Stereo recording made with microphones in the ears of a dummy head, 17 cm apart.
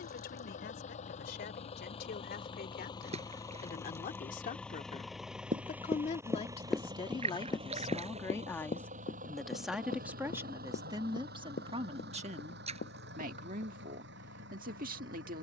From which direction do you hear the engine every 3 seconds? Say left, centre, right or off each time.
left, centre, right, right, right.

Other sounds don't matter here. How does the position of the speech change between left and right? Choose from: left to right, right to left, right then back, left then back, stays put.
left to right.